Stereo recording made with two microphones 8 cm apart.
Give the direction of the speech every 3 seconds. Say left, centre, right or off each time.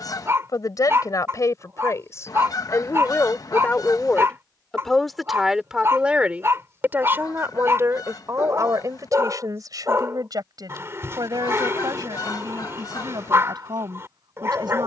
left, centre, right, right, right.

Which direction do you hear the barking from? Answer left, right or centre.
right.